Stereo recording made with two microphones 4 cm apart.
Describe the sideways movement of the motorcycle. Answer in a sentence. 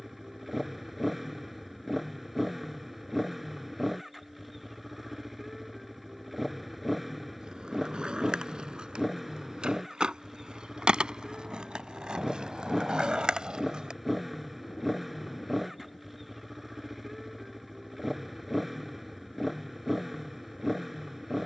In this clip you hear the motorcycle stay in one place.